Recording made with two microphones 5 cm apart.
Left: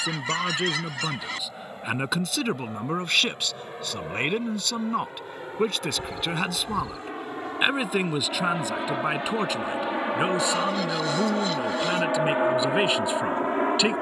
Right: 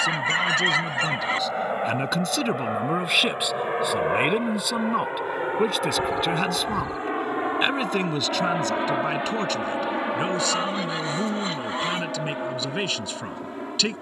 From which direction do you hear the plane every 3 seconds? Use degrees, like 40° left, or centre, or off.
50° right, 50° right, 30° right, 10° left, 40° left.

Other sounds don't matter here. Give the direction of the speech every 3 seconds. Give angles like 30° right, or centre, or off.
10° left, 10° right, centre, 10° left, 20° left.